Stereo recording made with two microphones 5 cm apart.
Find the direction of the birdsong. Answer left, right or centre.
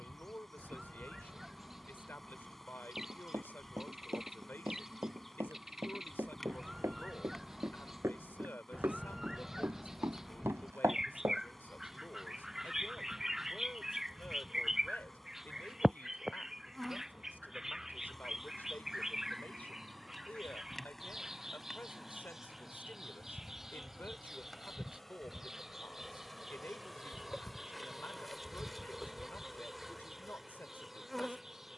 centre.